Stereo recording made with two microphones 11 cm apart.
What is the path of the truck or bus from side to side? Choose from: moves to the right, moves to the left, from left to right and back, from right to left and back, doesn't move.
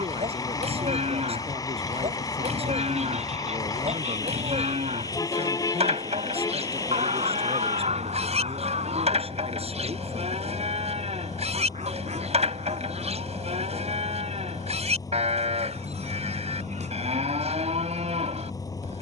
doesn't move.